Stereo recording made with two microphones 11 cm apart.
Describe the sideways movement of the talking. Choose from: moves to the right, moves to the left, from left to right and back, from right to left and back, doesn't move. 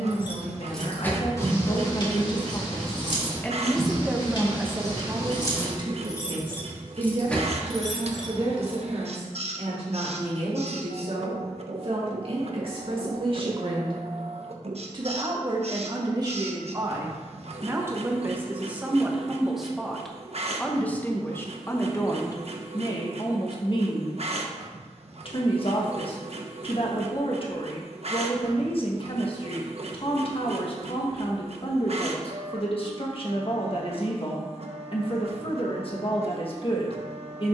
from left to right and back.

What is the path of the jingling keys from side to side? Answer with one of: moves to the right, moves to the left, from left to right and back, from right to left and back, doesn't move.
from right to left and back.